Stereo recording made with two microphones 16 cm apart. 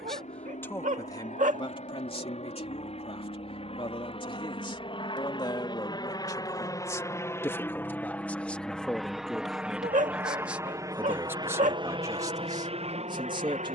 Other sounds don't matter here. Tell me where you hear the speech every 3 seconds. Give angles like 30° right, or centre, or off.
30° left, 30° left, 10° left, 10° right, 30° right.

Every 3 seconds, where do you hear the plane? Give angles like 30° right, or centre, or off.
50° left, 40° left, 10° left, 20° right, 40° right.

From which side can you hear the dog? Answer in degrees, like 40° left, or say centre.
50° right.